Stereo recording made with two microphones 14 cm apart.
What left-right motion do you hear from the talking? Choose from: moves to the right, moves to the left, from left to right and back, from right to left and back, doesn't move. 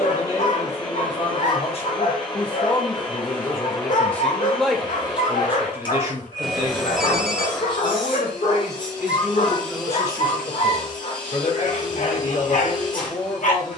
from left to right and back.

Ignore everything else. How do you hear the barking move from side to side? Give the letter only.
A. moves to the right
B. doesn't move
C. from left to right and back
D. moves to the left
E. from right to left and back
B.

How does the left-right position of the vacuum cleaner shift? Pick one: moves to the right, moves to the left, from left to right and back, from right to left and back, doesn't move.
doesn't move.